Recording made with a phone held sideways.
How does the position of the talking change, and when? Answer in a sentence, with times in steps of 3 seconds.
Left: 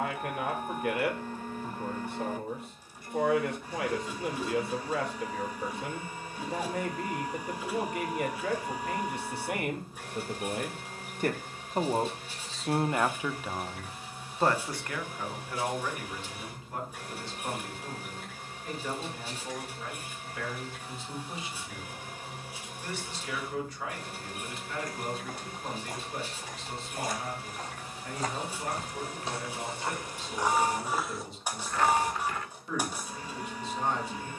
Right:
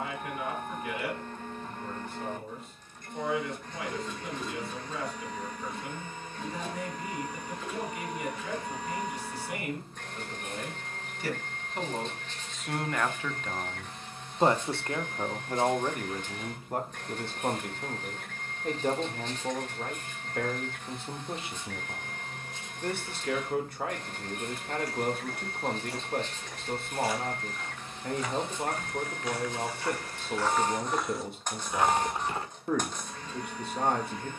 You can hear the talking on the left from 0 s, in the centre from 12 s and on the right from 15 s.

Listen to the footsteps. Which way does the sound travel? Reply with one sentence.
You can hear the footsteps move from left to right.